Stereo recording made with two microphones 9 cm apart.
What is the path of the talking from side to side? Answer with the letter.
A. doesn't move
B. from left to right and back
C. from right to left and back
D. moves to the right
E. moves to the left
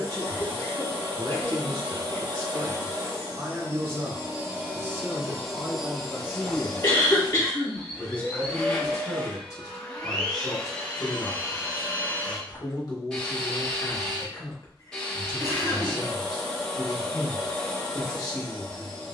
E.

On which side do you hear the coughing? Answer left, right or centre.
left.